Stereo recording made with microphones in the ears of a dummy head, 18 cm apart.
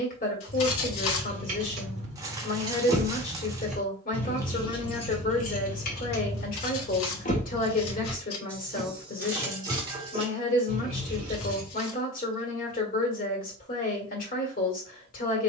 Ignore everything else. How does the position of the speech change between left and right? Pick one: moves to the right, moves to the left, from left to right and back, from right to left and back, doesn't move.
doesn't move.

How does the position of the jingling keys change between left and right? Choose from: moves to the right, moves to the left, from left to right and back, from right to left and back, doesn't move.
from right to left and back.